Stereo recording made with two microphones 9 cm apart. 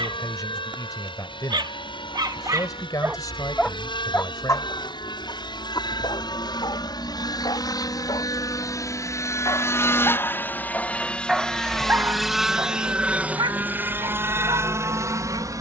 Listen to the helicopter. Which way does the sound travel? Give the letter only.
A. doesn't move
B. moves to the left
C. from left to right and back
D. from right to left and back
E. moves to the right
E.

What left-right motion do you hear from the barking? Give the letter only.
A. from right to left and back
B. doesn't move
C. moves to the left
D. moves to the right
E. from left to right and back
A.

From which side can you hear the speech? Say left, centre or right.
left.